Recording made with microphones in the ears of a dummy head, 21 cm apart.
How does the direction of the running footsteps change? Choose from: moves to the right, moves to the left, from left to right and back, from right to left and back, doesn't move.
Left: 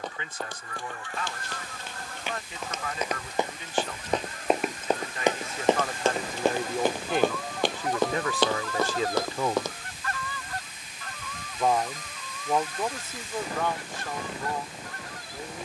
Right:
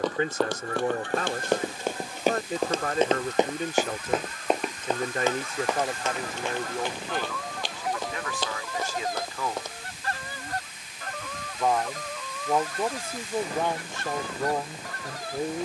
moves to the left.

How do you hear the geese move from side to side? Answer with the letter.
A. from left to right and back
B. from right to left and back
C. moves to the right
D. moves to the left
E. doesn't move
B.